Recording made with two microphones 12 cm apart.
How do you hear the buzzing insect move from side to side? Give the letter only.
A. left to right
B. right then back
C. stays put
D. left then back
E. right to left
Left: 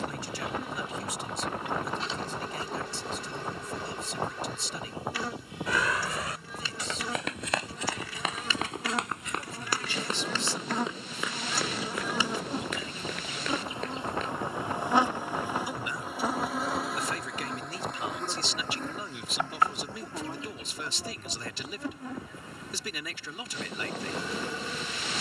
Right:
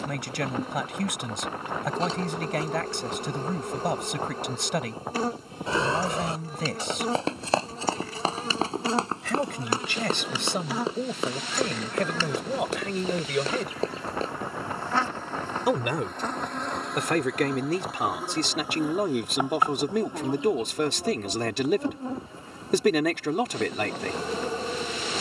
D.